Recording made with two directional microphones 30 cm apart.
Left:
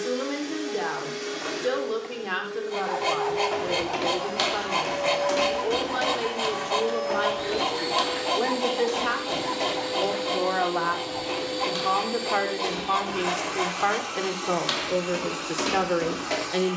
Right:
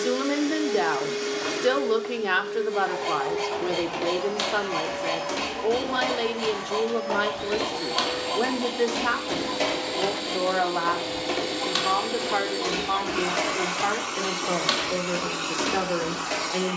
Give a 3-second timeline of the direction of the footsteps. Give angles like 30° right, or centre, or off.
off, 10° left, 20° right, 50° right, 40° right, centre.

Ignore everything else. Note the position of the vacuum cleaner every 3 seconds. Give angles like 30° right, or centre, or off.
20° right, centre, 10° left, 20° right, 30° right, 30° right.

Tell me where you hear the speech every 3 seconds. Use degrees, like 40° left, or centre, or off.
50° right, 40° right, 30° right, 10° right, 10° left, 10° left.